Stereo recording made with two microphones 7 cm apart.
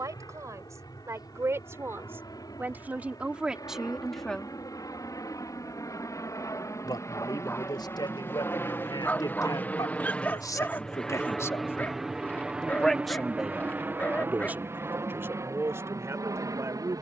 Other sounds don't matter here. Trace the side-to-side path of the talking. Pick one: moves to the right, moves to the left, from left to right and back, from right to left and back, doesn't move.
from right to left and back.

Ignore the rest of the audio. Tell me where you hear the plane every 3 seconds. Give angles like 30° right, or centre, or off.
70° left, 60° left, 40° left, 10° left, 20° right, 40° right.